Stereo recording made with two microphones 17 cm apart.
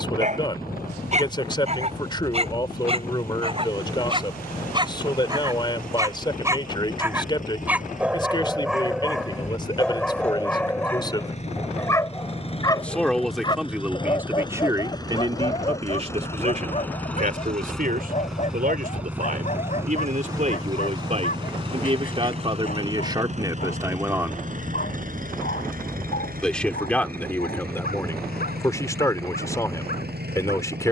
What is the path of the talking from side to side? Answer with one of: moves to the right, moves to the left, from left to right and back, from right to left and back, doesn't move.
from left to right and back.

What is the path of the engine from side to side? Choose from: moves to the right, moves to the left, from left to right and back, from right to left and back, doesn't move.
moves to the right.